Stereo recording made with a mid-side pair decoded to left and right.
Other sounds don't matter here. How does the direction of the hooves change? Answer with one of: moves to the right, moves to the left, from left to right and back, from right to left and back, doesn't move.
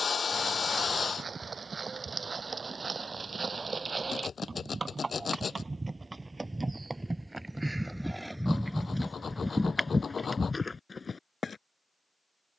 moves to the left.